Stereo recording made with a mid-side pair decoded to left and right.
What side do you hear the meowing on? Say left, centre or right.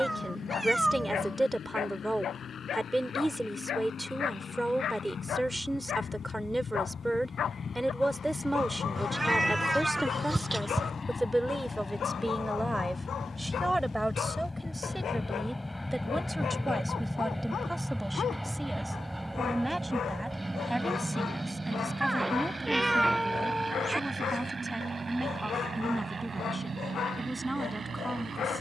centre.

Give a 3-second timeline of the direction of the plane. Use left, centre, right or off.
left, left, left, left, left, centre, centre, right, right, right.